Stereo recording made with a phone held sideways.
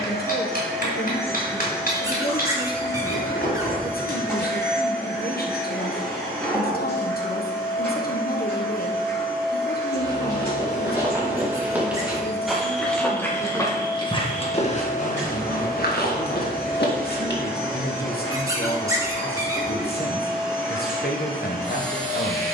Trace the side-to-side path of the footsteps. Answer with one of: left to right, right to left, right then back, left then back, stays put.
right to left.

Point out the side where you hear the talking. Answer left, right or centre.
left.